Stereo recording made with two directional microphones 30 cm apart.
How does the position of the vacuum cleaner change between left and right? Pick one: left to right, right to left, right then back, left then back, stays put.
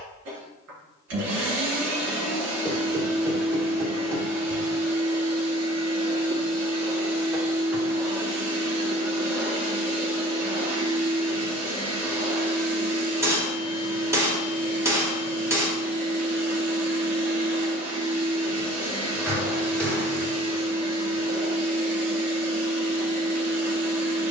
stays put.